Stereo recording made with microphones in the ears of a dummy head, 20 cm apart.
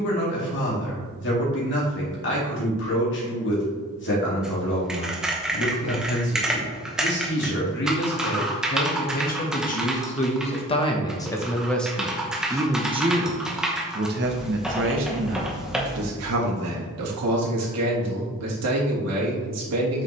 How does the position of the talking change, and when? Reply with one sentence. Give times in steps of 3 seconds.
In this clip you hear the talking on the left from 0 s and on the right from 12 s.